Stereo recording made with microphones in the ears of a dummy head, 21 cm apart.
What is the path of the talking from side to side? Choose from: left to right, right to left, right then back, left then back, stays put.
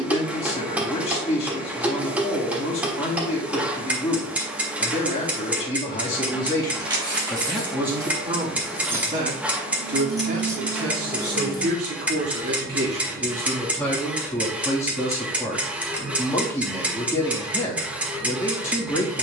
right then back.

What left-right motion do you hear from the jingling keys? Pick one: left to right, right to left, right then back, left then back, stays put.
right to left.